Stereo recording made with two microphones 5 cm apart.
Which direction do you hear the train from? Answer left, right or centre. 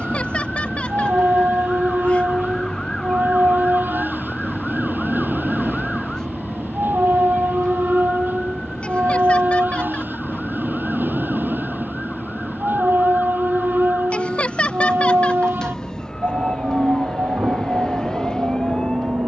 right.